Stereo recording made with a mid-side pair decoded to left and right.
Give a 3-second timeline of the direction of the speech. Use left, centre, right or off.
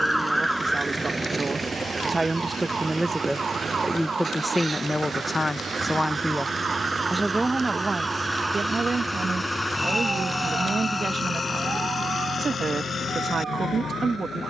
right, centre, right, right, right.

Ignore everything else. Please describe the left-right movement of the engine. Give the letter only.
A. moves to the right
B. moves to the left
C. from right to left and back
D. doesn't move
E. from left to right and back
B.